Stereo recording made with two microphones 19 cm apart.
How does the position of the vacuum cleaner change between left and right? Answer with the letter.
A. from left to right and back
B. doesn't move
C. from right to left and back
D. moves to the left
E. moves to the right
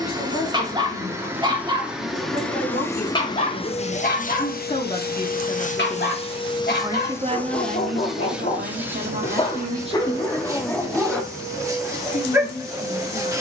C.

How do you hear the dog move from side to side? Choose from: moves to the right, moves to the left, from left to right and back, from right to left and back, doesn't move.
from right to left and back.